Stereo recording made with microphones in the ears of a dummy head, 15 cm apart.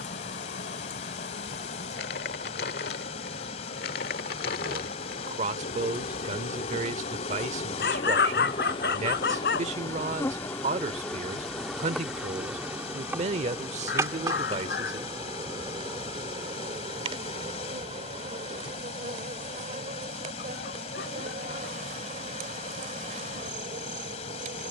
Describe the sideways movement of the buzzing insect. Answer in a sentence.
In this clip you hear the buzzing insect travel towards the right.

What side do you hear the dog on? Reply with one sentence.
You can hear the dog on the left.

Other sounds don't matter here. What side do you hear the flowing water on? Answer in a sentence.
You can hear the flowing water on the left.